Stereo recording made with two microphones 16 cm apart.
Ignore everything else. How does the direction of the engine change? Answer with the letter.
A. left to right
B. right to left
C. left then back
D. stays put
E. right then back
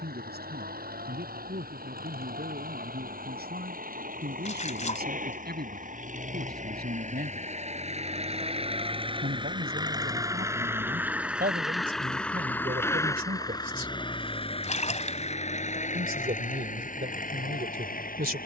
B.